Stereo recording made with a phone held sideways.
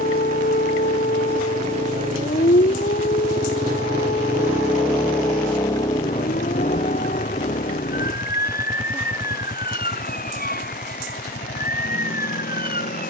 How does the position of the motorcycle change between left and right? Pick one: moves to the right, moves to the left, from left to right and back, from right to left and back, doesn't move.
moves to the left.